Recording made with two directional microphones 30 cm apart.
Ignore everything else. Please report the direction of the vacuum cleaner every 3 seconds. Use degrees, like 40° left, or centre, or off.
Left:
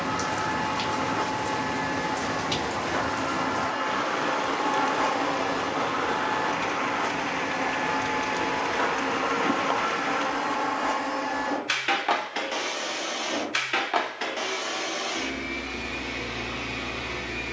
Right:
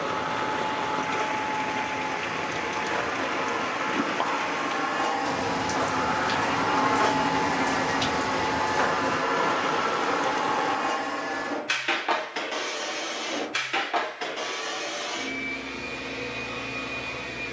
30° left, 10° left, 20° right, centre, 20° left, 30° left.